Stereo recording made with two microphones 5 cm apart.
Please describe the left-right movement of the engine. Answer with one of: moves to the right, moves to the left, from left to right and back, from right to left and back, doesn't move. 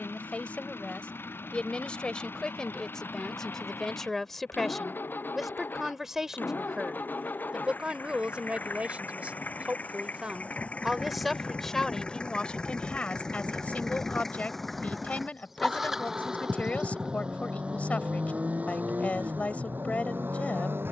moves to the right.